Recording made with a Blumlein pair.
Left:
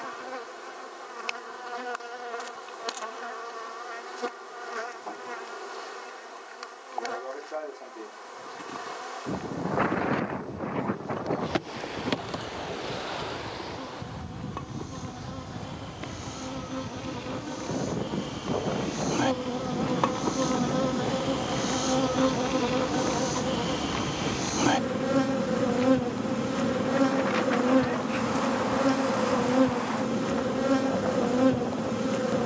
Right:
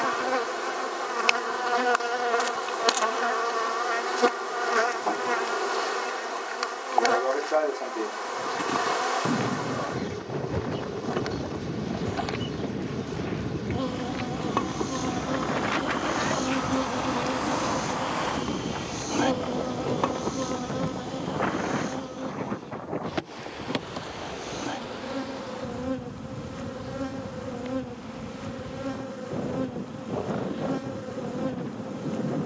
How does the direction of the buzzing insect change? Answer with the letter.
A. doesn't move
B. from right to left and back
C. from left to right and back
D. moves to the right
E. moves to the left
E.